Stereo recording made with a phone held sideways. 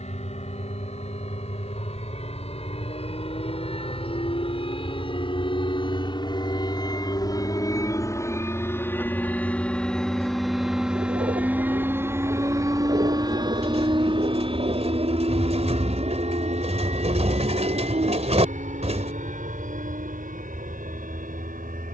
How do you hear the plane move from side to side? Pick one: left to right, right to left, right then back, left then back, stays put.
left to right.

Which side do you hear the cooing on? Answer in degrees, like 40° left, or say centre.
50° right.